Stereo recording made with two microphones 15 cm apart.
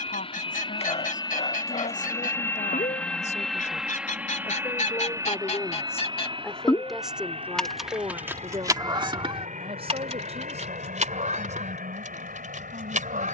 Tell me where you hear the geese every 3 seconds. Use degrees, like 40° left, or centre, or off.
70° left, 60° left, centre, 50° right, 60° right.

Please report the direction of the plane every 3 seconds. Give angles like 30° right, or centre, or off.
30° left, 10° right, 40° right, 50° right, 60° right.